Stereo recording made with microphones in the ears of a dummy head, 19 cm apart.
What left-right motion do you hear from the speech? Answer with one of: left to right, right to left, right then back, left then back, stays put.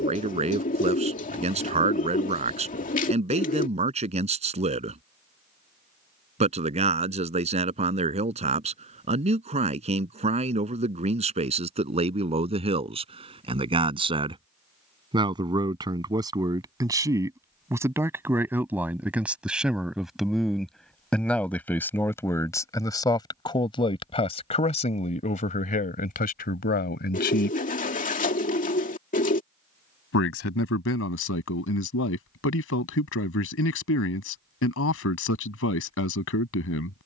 right to left.